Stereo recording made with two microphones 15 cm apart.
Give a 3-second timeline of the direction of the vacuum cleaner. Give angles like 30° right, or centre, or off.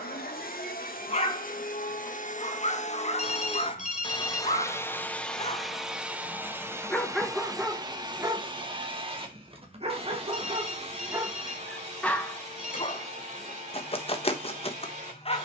70° left, 20° left, 20° right, 40° right, 50° right.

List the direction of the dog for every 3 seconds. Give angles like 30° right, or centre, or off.
50° left, 50° left, centre, 30° right, 30° left.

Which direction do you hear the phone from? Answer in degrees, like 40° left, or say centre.
50° left.